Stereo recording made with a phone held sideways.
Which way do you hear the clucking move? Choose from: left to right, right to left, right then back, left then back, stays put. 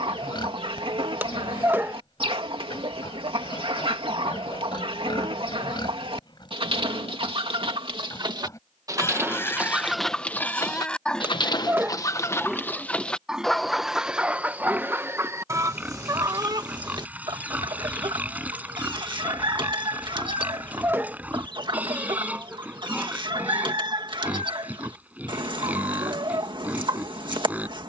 left then back.